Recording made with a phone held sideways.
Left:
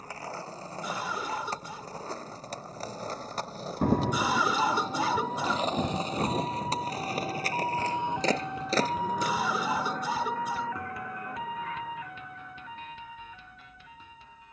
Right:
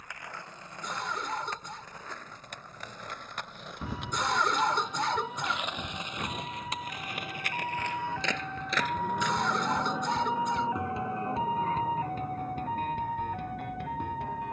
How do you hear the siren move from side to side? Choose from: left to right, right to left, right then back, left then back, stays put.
left to right.